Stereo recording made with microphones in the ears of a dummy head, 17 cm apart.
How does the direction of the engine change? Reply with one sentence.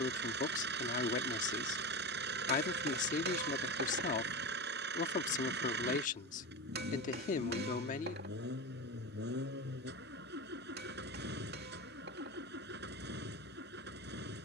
In this clip you hear the engine stay put.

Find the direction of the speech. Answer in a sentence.
You can hear the speech on the left.